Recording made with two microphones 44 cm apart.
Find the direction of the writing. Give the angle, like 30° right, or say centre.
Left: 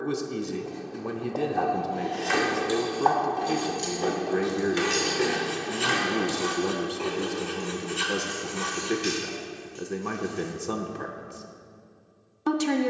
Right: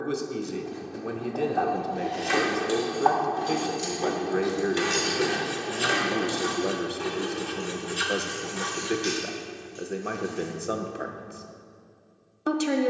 30° right.